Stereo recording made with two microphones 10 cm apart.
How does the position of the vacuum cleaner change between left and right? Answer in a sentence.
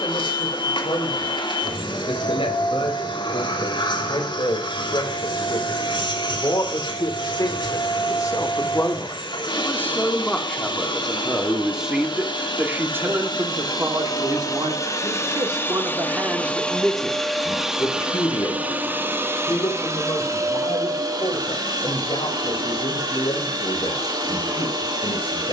You can hear the vacuum cleaner move to the right.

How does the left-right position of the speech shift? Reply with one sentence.
In this clip you hear the speech move from left to right and back again.